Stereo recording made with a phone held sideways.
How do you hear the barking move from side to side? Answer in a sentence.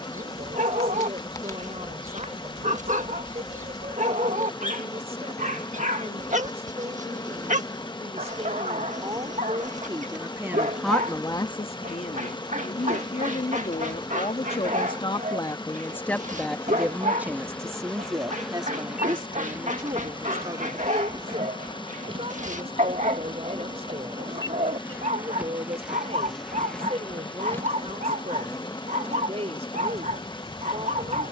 In this clip you hear the barking stay in one place.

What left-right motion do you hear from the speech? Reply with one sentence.
You can hear the speech go left and come back.